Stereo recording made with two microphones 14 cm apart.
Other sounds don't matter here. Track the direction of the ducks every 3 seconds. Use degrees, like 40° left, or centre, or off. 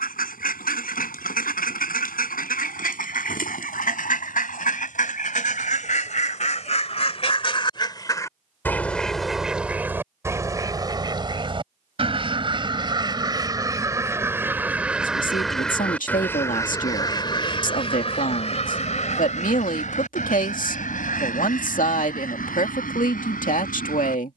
80° left, 70° left, 40° left, 20° right, 30° right, 20° left, 60° left, 80° left.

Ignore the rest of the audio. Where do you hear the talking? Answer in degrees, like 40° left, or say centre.
70° left.